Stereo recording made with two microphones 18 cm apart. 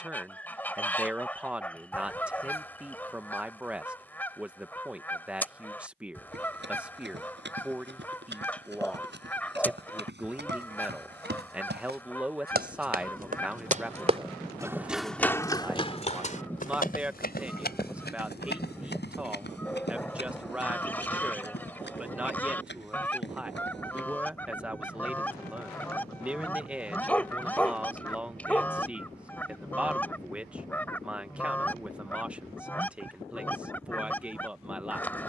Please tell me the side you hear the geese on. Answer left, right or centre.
centre.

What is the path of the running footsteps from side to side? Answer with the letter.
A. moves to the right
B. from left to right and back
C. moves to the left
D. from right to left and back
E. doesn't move
C.